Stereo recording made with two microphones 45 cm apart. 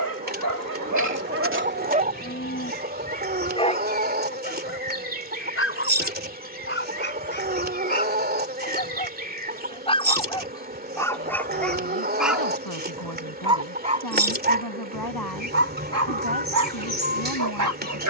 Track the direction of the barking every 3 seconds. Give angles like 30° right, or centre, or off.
40° right, 20° left, 20° left, 10° left, 10° right, 40° right.